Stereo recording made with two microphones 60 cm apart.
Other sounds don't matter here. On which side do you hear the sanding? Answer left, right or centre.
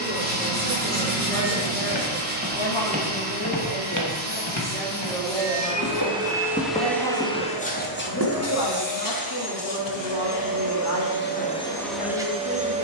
right.